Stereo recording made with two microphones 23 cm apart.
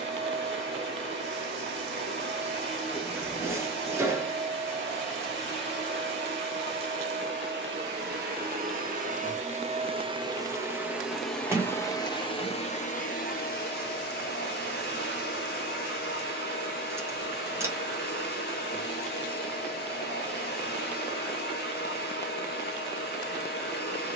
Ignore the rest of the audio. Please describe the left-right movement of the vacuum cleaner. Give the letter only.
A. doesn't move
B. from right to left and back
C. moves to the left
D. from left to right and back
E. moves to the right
C.